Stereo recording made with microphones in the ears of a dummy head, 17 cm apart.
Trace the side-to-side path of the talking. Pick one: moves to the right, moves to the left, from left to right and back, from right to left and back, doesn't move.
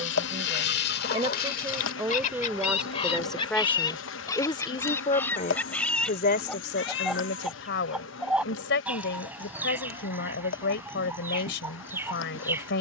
moves to the left.